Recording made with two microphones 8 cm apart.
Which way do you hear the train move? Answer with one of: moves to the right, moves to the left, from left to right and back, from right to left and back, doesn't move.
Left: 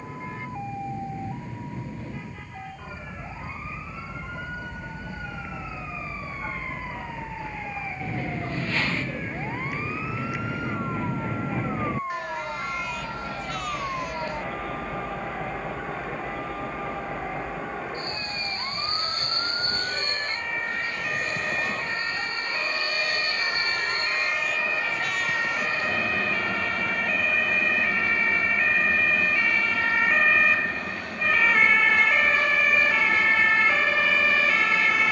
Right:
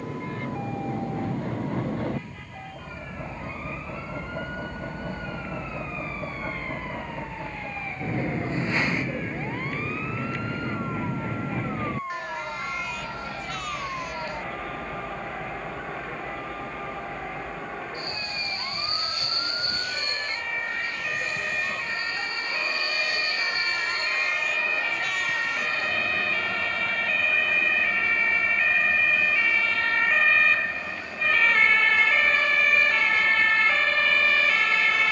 moves to the left.